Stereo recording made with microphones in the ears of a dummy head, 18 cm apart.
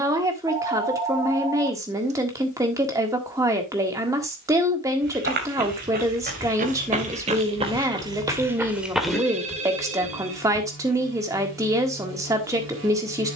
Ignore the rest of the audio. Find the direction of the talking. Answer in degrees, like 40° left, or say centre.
20° right.